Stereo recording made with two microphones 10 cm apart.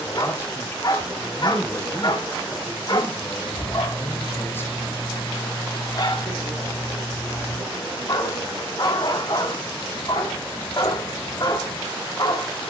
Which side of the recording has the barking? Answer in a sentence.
You can hear the barking on the left.